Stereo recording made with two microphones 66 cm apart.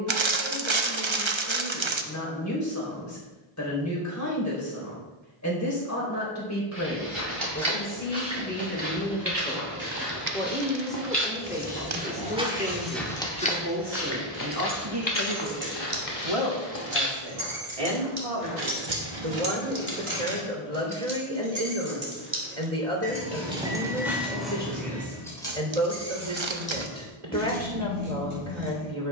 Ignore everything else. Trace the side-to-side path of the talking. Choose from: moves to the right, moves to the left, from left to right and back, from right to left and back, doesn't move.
moves to the right.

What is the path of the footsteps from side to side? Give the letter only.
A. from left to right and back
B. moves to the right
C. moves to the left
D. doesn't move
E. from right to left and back
C.